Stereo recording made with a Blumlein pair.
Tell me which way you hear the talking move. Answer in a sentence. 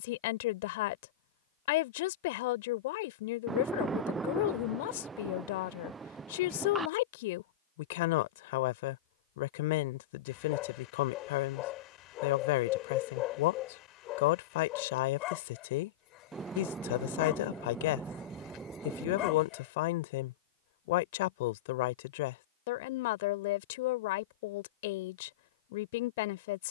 You can hear the talking stay put.